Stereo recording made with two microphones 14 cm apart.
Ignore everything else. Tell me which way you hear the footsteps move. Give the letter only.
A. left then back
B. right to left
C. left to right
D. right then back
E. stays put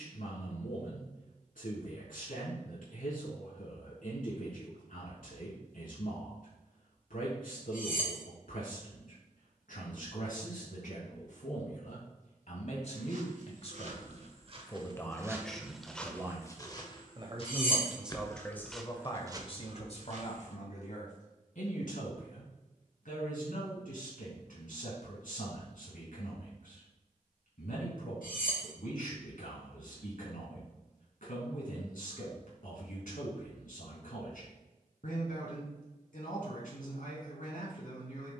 A.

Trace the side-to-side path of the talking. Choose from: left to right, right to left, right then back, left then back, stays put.
right then back.